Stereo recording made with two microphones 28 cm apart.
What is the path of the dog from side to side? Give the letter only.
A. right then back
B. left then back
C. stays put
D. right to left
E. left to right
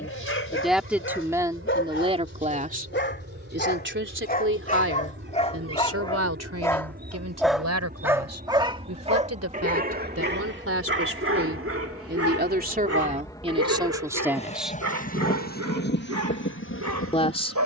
E.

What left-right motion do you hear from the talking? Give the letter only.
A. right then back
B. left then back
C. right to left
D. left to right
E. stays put
A.